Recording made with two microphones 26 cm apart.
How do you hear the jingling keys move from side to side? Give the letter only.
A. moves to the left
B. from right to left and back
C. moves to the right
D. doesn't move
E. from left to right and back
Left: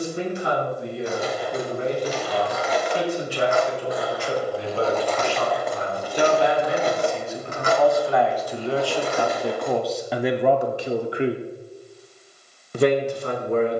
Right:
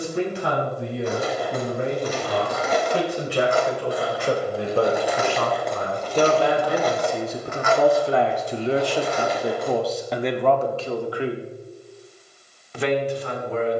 A.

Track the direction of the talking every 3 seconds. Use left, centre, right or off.
right, right, right, centre, left.